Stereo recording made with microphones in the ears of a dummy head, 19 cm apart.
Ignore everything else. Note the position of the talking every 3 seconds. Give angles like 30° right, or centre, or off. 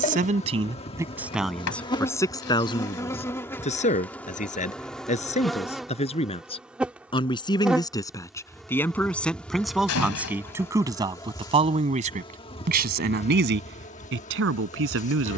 centre, 30° left, 20° left, 10° right, 50° right.